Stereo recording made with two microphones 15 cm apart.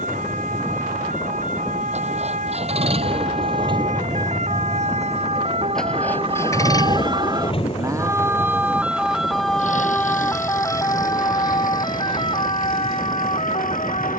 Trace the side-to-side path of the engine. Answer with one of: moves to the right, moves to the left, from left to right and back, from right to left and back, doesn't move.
moves to the left.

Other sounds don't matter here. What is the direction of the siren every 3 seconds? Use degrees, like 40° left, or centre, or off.
70° right, 60° right, 30° right, 20° left, 40° left.